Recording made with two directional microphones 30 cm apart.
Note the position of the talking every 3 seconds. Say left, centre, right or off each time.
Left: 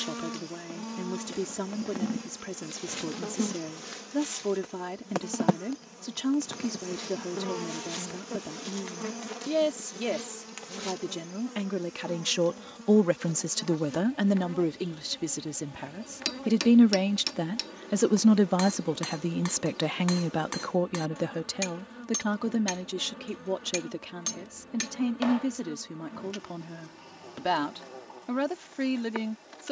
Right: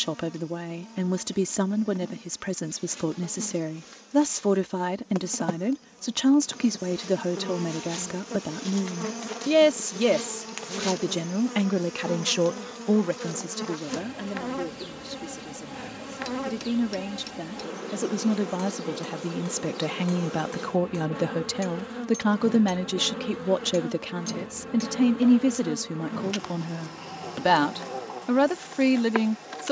right, right, right, right, left, left, centre, right, right, right.